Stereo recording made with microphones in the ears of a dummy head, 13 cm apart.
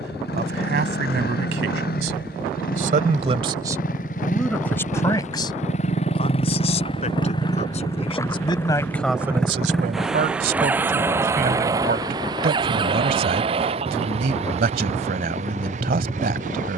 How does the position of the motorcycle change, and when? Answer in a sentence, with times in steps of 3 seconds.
In this clip you hear the motorcycle on the left from 0 s, in the centre from 9 s and on the right from 12 s.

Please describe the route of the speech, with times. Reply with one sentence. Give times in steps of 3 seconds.
In this clip you hear the speech on the right from 0 s, in the centre from 3 s, on the left from 6 s and on the right from 9 s.